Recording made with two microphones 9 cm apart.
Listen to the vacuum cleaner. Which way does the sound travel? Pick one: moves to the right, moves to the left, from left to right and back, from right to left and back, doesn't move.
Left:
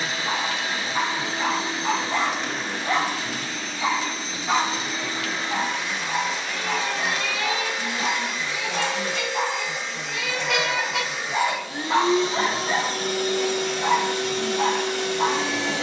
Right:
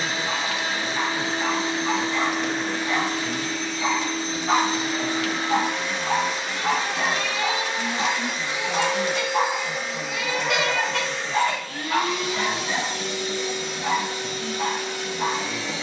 moves to the left.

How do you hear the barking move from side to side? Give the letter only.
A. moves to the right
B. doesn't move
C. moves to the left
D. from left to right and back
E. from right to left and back
D.